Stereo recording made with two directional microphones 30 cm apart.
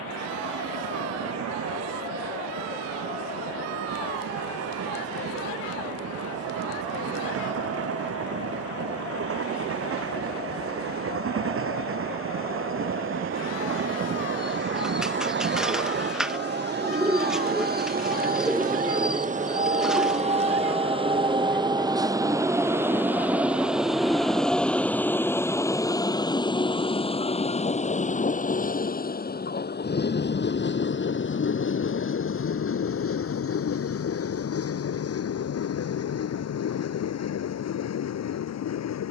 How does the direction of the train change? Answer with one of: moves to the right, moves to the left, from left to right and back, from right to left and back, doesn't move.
moves to the left.